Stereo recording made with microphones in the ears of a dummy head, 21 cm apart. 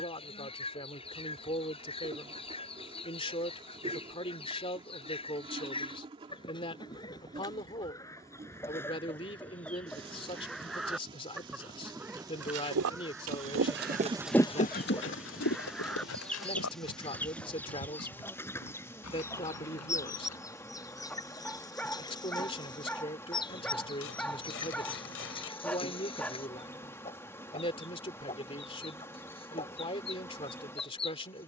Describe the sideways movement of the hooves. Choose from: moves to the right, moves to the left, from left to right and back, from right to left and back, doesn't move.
moves to the left.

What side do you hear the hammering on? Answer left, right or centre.
left.